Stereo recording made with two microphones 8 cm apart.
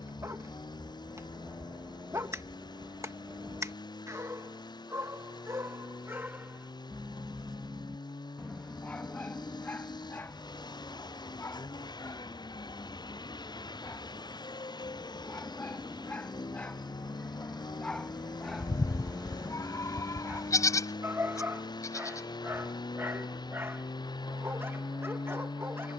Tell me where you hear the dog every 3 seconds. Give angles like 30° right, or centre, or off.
40° right, 40° right, centre, 30° left, 40° left, 20° left, 10° right, 30° right, 30° right.